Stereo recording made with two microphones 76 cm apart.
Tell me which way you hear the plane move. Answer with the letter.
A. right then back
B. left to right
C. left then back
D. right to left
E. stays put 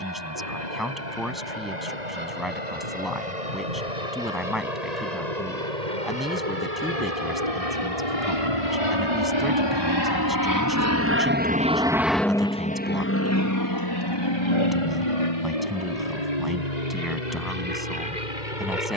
D.